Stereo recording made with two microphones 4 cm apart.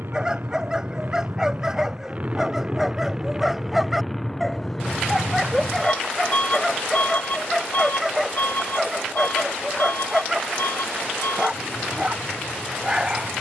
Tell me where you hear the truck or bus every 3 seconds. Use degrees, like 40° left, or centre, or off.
40° right, 10° left, 50° left, 60° left, 70° left.